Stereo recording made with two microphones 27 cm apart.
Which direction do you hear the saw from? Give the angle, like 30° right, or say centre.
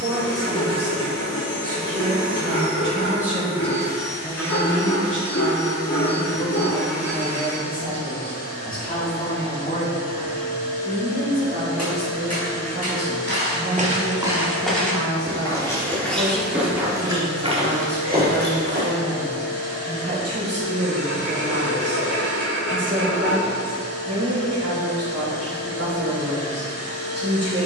70° left.